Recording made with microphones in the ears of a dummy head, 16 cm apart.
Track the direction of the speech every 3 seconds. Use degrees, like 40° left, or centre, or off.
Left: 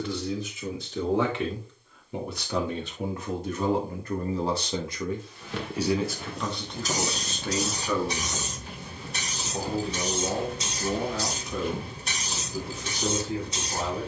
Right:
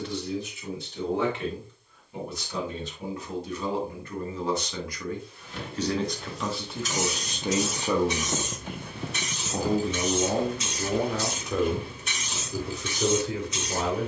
60° left, 30° left, 10° right, 50° right, 60° right.